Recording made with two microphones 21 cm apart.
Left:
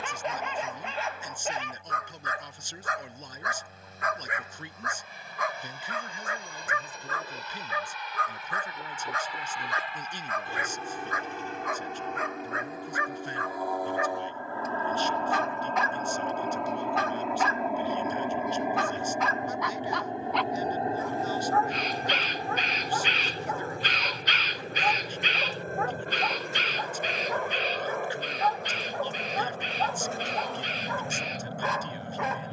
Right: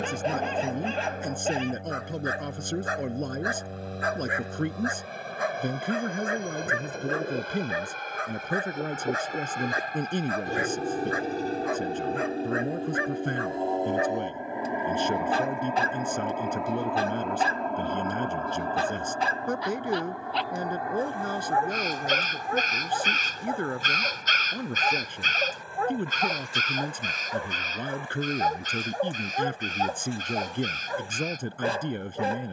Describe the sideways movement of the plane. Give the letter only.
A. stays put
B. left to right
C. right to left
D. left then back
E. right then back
C.